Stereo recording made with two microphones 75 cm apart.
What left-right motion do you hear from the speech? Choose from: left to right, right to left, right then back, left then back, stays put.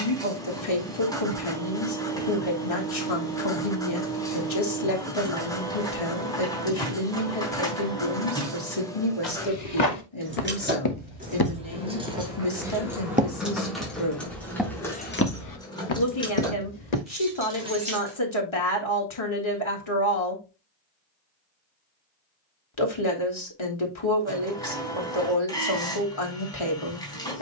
stays put.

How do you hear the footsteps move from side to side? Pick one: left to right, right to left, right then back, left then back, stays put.
right then back.